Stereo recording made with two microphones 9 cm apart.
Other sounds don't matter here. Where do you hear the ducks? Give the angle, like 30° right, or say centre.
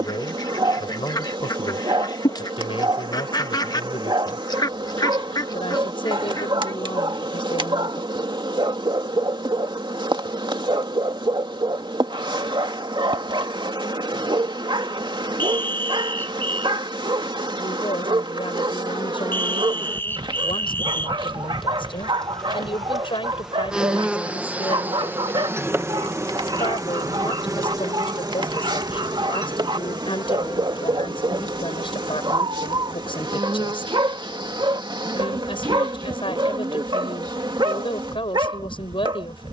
50° left.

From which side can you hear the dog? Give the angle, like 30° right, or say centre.
70° right.